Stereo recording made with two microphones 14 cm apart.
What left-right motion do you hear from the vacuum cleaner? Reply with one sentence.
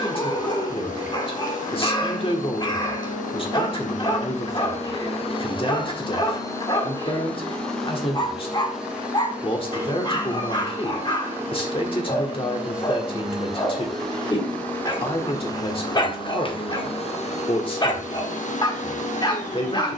In this clip you hear the vacuum cleaner move from left to right and back again.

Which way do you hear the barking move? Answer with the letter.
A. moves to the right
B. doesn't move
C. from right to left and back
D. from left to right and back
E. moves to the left
B.